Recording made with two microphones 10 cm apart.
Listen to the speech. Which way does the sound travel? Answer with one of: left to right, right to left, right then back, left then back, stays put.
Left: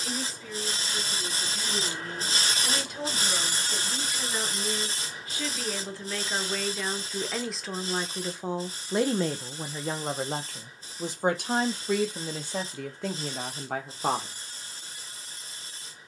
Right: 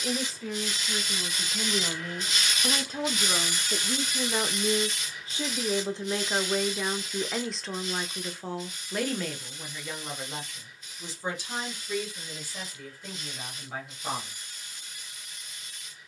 right to left.